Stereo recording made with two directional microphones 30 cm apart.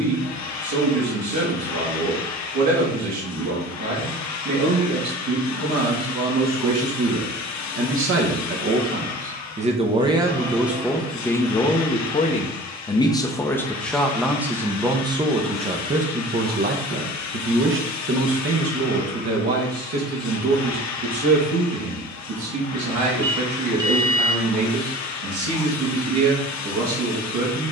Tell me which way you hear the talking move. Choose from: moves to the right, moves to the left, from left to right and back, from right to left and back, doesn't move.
from right to left and back.